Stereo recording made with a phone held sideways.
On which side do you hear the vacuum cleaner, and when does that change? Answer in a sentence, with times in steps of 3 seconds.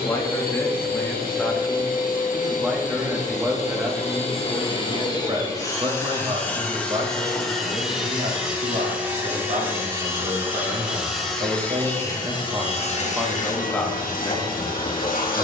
You can hear the vacuum cleaner on the left from 0 s, in the centre from 6 s and on the left from 12 s.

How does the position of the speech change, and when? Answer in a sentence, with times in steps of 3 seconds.
In this clip you hear the speech in the centre from 0 s, on the right from 3 s and in the centre from 12 s.